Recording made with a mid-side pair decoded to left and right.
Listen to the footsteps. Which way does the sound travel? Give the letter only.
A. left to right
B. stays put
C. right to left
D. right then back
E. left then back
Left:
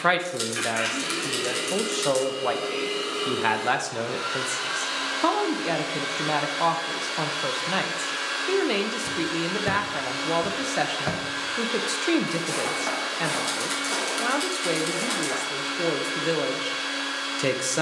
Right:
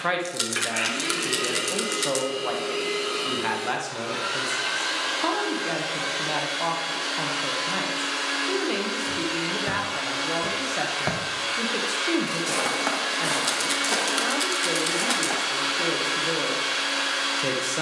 A.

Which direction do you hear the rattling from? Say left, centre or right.
right.